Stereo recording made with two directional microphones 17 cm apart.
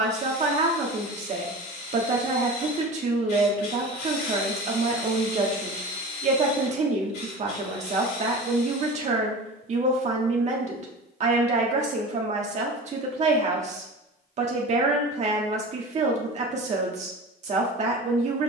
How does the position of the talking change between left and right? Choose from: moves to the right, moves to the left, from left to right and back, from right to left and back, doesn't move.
doesn't move.